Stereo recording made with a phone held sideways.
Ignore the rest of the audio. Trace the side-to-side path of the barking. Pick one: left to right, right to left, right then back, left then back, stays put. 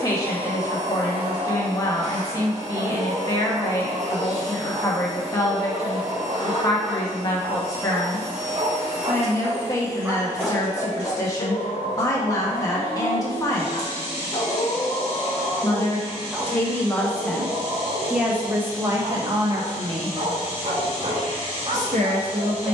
left then back.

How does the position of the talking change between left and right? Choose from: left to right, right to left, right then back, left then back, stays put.
left to right.